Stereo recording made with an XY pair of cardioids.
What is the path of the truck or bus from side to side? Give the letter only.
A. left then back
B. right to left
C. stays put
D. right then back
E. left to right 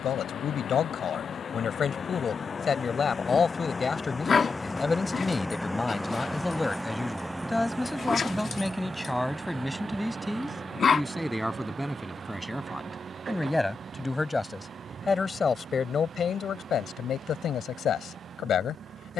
E.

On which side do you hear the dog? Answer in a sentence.
You can hear the dog on the left.